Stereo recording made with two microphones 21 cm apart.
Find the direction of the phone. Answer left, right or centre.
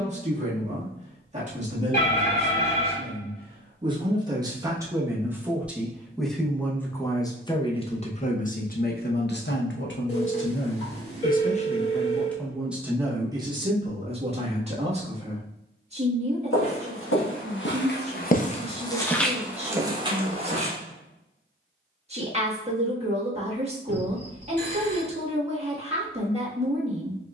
left.